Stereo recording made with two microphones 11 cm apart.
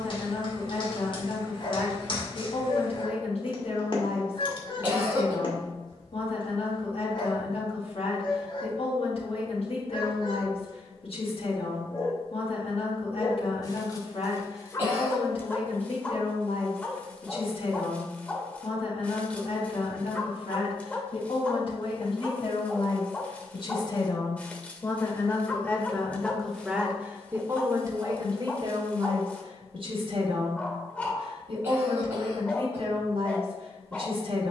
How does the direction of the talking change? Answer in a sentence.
In this clip you hear the talking move from left to right.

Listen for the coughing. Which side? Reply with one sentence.
You can hear the coughing on the right.